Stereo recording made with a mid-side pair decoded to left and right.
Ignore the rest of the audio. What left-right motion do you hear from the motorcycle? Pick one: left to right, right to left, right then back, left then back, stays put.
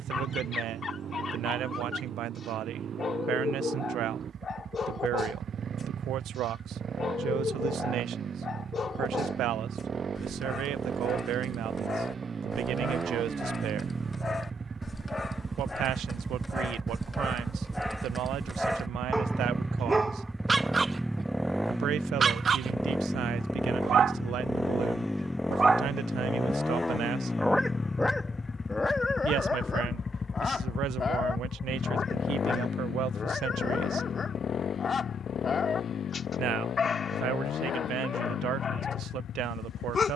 right to left.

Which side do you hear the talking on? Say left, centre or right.
right.